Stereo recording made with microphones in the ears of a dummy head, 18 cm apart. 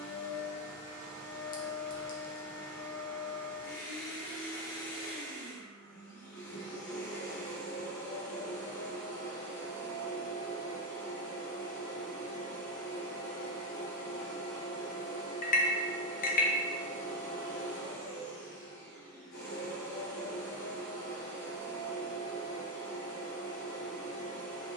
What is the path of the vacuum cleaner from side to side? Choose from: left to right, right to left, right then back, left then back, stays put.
stays put.